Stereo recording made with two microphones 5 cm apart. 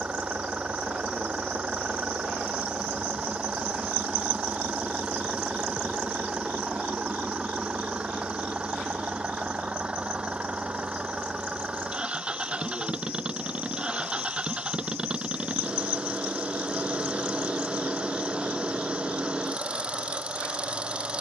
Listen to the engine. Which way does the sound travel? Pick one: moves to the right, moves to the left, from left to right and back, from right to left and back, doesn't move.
doesn't move.